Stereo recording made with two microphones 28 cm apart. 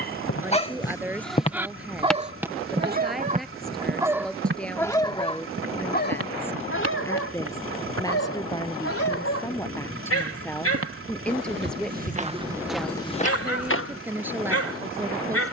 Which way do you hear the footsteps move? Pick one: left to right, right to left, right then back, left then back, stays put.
right then back.